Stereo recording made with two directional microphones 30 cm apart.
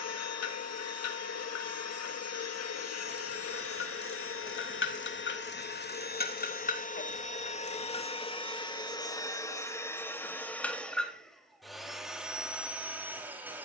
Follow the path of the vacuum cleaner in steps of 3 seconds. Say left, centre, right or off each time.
left, left, left, centre, centre.